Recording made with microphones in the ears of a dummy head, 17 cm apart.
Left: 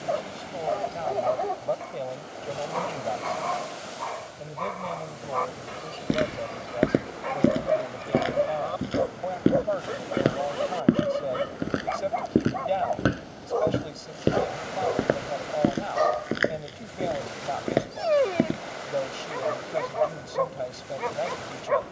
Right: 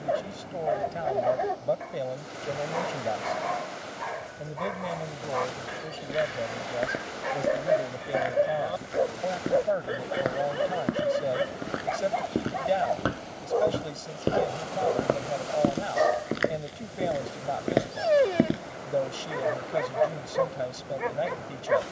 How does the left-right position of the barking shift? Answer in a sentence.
In this clip you hear the barking stay put.